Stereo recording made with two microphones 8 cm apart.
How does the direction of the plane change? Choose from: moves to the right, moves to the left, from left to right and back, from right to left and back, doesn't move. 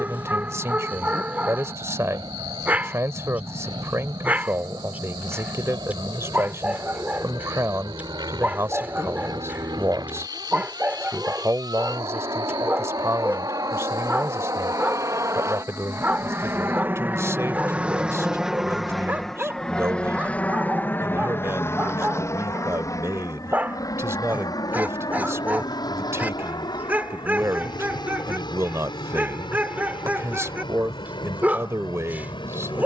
moves to the left.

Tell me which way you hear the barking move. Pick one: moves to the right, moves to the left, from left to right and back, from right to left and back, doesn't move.
doesn't move.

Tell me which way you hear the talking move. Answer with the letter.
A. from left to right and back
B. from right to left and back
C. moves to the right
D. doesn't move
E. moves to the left
D.